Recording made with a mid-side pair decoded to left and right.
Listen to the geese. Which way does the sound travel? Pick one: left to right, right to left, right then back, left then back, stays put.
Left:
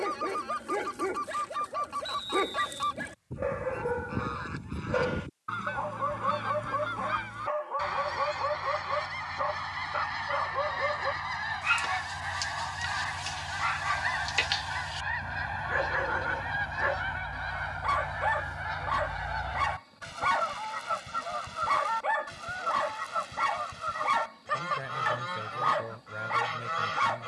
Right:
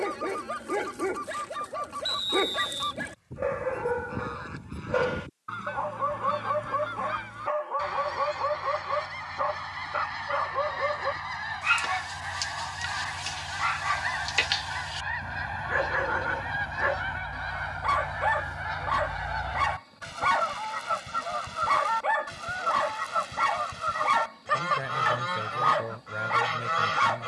left to right.